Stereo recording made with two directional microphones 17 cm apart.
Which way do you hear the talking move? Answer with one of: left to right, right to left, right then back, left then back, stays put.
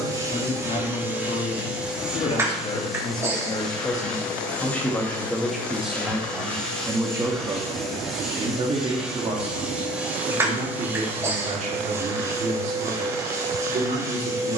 left to right.